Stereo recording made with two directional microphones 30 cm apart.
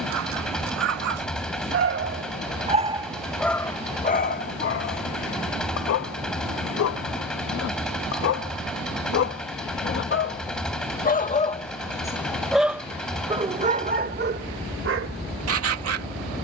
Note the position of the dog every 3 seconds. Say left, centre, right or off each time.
right, left, left, left, right, right.